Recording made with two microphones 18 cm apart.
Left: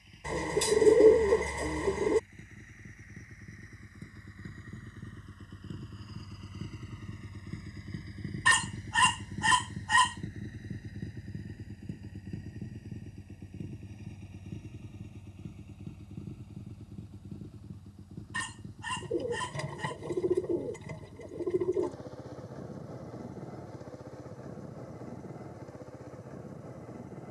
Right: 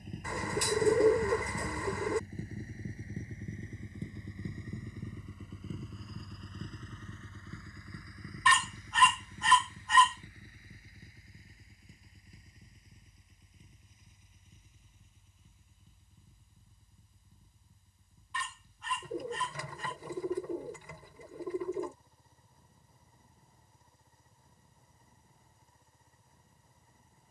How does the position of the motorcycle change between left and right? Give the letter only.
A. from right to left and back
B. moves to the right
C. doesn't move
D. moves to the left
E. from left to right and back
D.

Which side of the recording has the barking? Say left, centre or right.
left.